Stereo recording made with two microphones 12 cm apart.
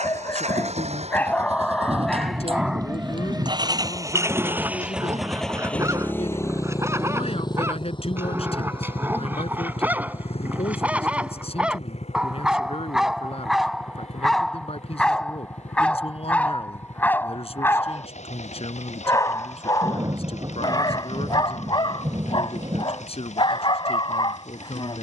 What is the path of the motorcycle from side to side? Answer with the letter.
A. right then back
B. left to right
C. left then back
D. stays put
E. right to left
E.